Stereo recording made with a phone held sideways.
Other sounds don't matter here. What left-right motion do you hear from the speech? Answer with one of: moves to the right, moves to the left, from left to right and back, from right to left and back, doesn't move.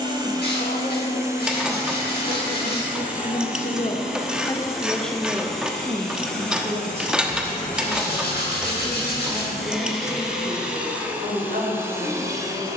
moves to the right.